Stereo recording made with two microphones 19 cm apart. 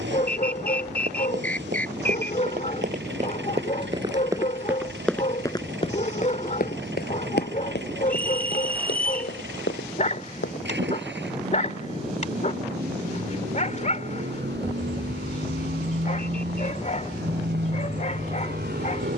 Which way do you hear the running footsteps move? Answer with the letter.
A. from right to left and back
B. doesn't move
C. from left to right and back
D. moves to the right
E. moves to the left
E.